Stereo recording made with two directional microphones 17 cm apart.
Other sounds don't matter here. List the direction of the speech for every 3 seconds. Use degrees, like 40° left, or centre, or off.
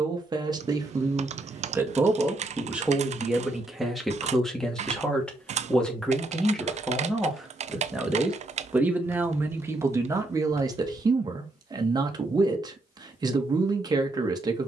20° right, centre, centre, 20° right, 20° right.